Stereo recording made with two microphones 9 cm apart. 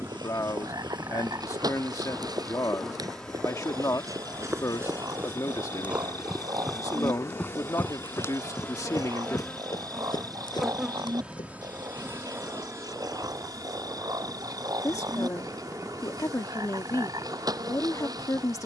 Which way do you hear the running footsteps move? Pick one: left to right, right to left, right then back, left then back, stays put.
right to left.